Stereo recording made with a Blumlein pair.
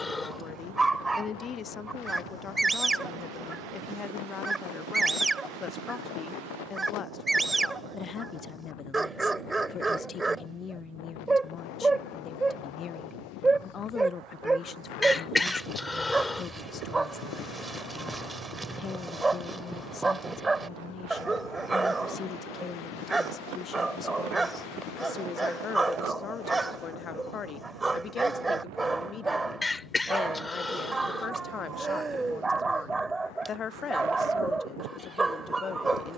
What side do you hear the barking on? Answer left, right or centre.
centre.